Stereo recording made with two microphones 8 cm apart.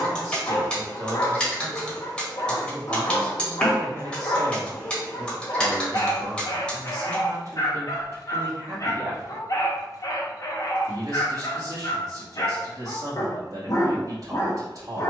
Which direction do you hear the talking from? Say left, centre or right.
right.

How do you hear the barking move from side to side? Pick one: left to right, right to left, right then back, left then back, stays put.
stays put.